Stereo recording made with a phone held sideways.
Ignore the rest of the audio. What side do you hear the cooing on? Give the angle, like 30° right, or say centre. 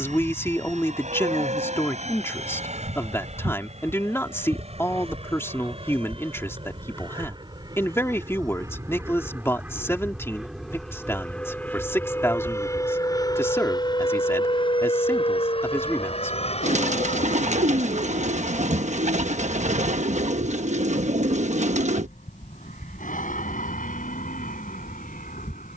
60° right.